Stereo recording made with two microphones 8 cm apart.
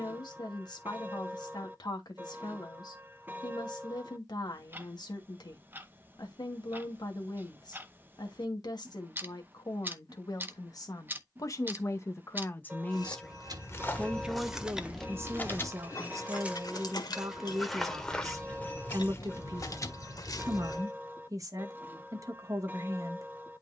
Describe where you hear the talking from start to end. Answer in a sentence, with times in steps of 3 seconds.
In this clip you hear the talking on the left from 0 s, in the centre from 12 s and on the right from 15 s.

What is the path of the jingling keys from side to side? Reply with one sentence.
In this clip you hear the jingling keys move from right to left and back again.